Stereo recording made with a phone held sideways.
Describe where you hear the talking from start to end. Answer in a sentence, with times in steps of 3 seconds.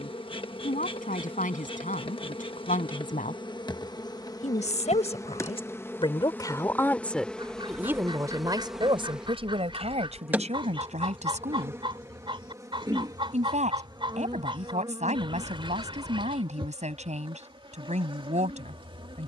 You can hear the talking on the left from 0 s, in the centre from 6 s and on the right from 9 s.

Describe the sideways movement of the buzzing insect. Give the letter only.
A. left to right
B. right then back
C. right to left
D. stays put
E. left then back
A.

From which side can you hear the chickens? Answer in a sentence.
In this clip you hear the chickens on the right.